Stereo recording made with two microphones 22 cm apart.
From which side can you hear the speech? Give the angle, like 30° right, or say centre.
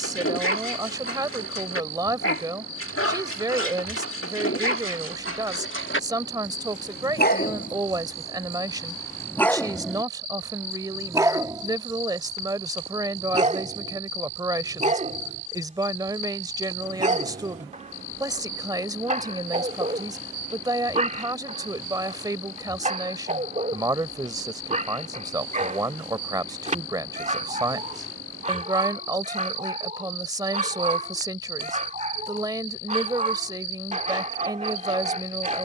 20° right.